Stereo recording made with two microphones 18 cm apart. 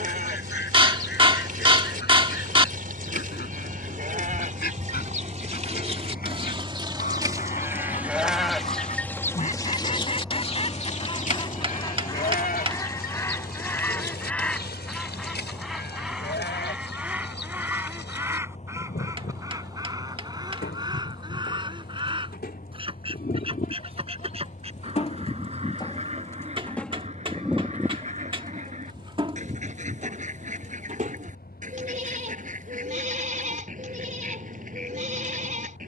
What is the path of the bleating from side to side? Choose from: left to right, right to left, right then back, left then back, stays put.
left then back.